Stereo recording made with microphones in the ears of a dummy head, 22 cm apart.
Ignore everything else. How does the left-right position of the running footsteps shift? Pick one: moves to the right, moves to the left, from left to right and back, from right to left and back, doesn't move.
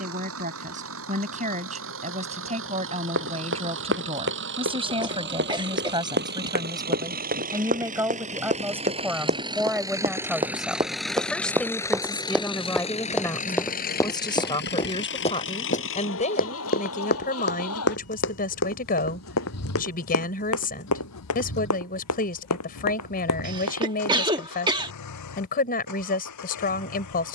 moves to the left.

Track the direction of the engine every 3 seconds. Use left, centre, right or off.
right, right, right, centre, left, left, left, left, left.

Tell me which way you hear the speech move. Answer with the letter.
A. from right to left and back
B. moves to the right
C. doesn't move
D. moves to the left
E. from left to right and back
D.